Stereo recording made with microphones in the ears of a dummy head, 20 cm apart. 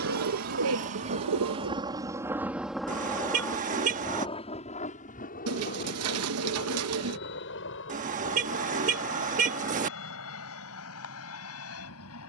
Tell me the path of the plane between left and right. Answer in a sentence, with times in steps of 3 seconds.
You can hear the plane on the right from 0 s and on the left from 3 s.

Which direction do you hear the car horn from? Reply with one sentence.
In this clip you hear the car horn on the right.